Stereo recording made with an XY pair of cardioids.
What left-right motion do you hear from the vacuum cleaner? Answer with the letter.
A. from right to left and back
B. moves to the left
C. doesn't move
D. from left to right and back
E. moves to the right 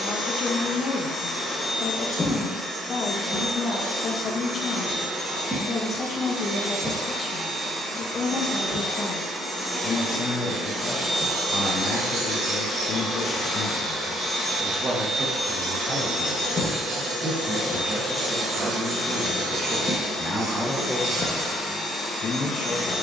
D.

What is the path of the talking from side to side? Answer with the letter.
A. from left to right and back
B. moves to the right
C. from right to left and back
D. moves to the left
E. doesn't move
A.